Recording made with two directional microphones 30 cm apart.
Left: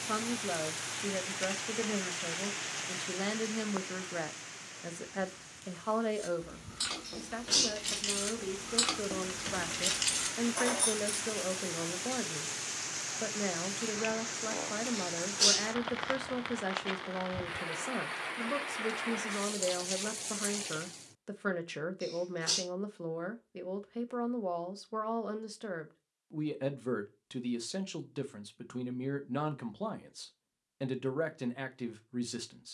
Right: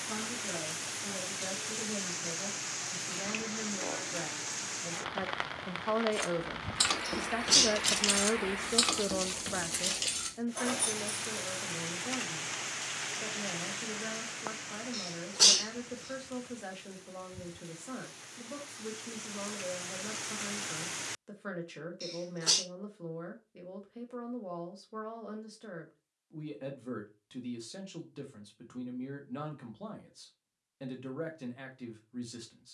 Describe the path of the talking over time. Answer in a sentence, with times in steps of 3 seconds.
You can hear the talking on the left from 0 s, on the right from 6 s and on the left from 9 s.